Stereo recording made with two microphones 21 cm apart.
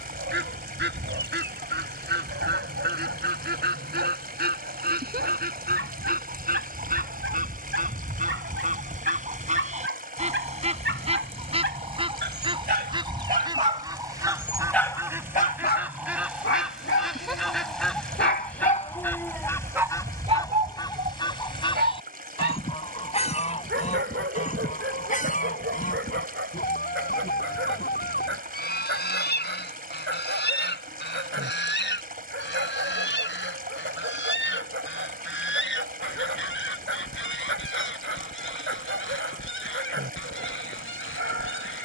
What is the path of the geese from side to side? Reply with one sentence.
You can hear the geese travel towards the left.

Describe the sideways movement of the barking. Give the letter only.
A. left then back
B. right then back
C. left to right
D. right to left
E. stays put
A.